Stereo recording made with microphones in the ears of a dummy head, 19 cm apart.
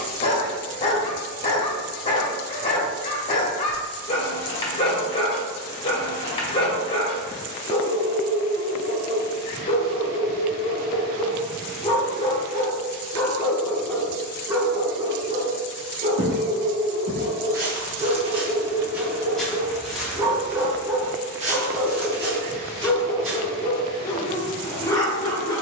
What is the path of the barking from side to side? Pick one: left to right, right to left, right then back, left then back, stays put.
right then back.